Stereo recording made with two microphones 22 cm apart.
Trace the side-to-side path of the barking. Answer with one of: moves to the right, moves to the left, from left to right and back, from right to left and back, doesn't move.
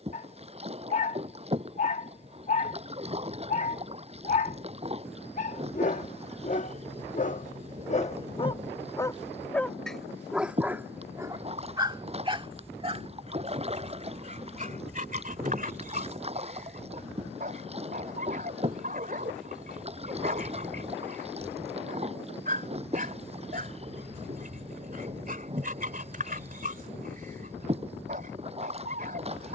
moves to the right.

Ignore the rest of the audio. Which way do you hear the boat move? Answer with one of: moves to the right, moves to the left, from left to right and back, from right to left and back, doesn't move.
doesn't move.